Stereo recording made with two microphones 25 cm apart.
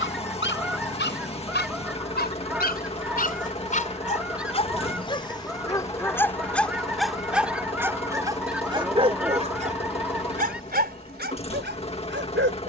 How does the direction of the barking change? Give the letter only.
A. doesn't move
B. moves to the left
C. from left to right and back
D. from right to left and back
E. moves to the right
E.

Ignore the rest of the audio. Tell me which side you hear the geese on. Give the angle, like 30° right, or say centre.
centre.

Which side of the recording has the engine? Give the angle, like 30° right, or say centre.
20° left.